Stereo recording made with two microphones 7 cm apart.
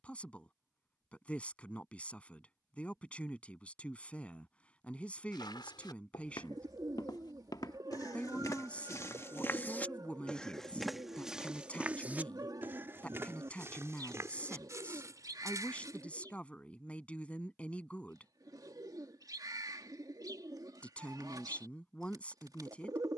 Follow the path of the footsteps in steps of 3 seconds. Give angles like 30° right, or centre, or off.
off, 80° left, 60° left, 10° left, 40° right, 50° right, off, off.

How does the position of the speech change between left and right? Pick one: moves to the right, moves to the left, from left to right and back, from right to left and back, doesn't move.
doesn't move.